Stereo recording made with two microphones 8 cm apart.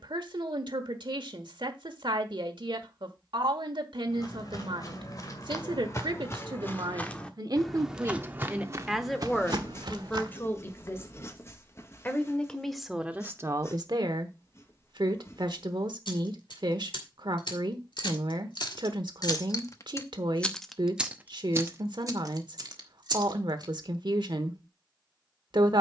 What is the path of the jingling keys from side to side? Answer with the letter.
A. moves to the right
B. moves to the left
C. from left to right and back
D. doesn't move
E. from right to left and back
A.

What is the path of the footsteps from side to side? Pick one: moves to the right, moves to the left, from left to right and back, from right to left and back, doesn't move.
moves to the right.